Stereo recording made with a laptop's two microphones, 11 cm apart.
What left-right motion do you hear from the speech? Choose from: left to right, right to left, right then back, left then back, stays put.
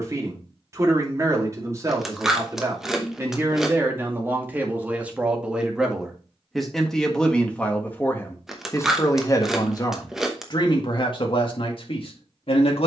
right to left.